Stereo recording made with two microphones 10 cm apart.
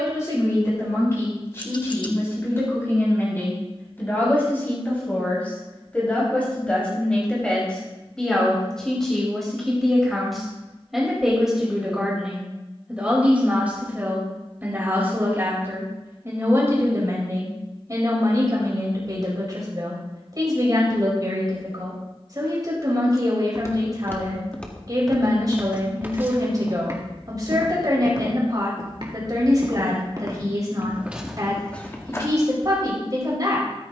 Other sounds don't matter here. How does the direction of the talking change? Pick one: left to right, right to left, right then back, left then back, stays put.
left to right.